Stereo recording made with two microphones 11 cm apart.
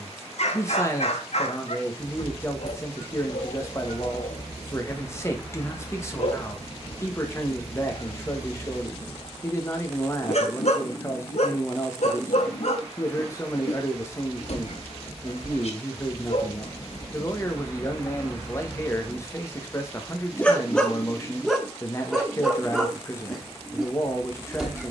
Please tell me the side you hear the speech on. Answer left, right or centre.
left.